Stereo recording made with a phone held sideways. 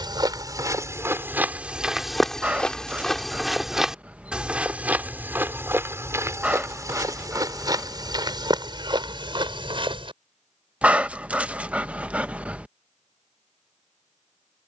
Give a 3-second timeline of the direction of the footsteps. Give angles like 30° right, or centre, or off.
10° right, 10° right, 30° right, 40° right, off.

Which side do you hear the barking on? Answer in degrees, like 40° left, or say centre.
10° right.